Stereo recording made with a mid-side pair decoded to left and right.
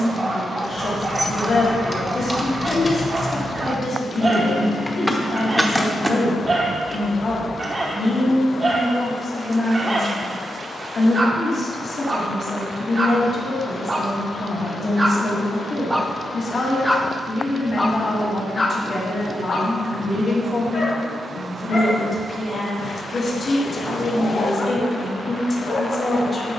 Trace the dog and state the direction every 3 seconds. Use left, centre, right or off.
right, right, right, right, right, centre, left, left, left.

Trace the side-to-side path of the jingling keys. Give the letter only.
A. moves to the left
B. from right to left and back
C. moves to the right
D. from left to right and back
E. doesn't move
B.